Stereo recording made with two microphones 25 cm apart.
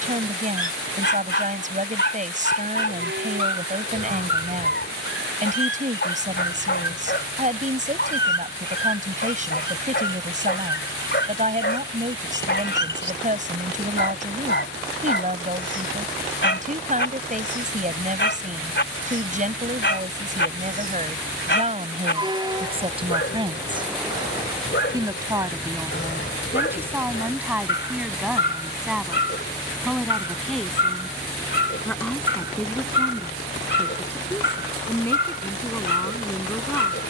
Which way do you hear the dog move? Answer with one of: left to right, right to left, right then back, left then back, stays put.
stays put.